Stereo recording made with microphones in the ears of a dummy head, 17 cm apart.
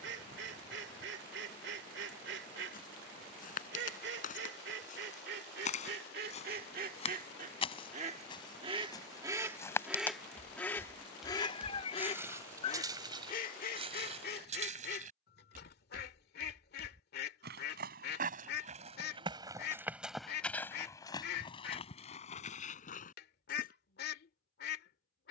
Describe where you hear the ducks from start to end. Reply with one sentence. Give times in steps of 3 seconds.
In this clip you hear the ducks on the right from 0 s, in the centre from 9 s and on the left from 12 s.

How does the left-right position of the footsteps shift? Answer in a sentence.
In this clip you hear the footsteps move from left to right and back again.